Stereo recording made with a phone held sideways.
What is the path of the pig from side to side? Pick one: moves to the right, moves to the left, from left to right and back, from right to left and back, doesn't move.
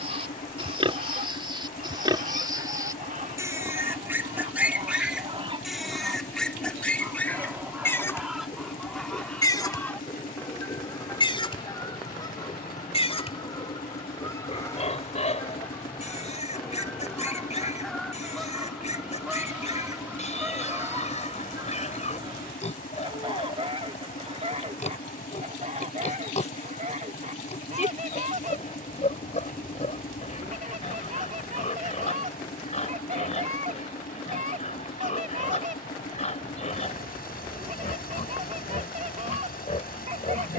moves to the left.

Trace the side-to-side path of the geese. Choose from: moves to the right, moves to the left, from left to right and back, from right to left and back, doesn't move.
from right to left and back.